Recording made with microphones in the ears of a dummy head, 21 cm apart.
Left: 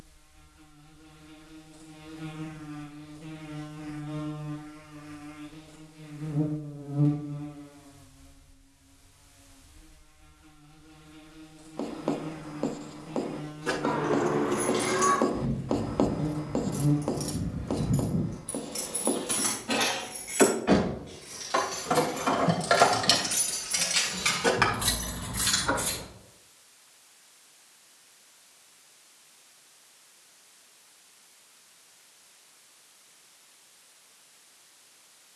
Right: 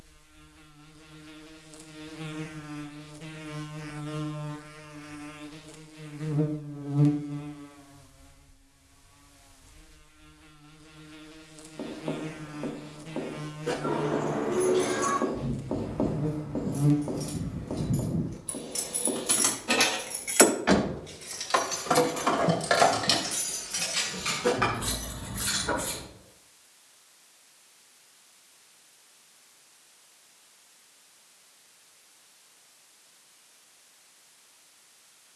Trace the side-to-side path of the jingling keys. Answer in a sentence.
In this clip you hear the jingling keys move from left to right and back again.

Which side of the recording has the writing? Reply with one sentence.
In this clip you hear the writing on the left.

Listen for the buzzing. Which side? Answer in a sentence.
In this clip you hear the buzzing on the right.